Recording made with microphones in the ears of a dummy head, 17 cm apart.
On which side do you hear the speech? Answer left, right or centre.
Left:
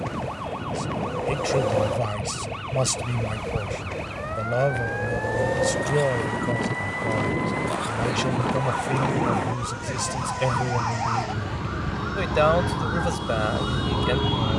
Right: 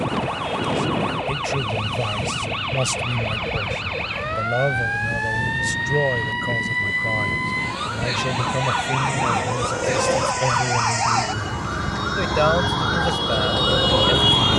centre.